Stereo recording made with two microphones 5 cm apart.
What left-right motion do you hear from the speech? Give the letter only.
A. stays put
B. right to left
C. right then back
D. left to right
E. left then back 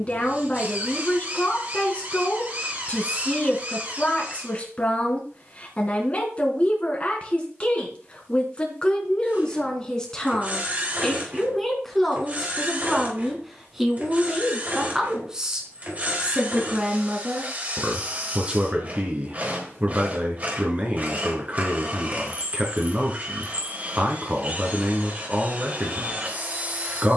D.